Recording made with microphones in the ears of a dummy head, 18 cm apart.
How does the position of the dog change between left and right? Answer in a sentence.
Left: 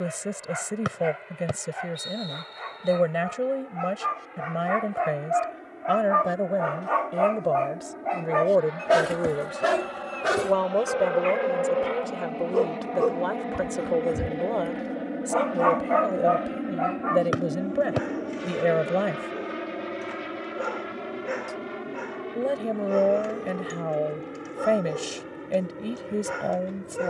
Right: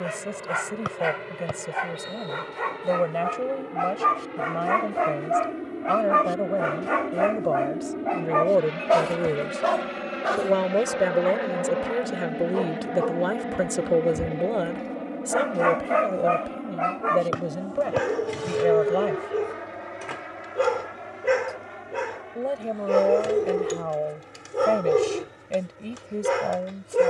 You can hear the dog move from right to left and back again.